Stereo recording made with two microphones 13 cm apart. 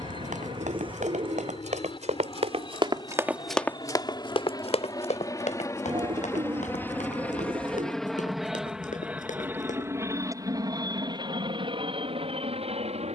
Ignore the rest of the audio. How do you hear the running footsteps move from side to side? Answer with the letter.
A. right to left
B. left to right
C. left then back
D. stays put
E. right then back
A.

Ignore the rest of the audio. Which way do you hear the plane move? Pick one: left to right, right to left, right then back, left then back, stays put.
left to right.